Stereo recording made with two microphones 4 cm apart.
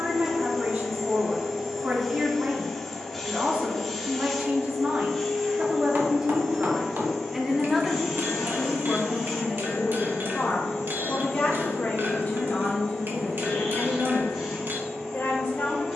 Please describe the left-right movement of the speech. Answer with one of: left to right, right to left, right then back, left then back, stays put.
right to left.